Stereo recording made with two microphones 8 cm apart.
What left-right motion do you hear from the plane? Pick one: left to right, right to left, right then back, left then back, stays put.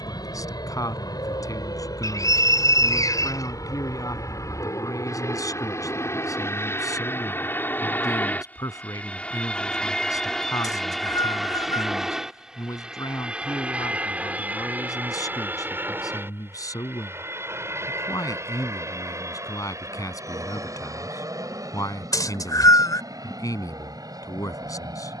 left to right.